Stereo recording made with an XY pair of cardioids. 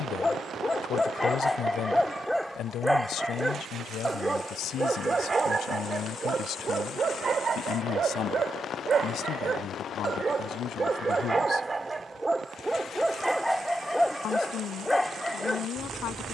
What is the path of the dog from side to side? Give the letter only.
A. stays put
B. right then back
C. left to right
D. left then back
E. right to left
B.